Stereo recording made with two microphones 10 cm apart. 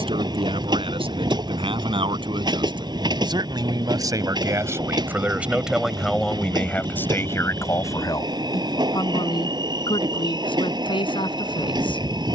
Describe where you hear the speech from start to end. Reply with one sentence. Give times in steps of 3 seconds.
In this clip you hear the speech on the right from 0 s and on the left from 6 s.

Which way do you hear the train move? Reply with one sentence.
You can hear the train stay in one place.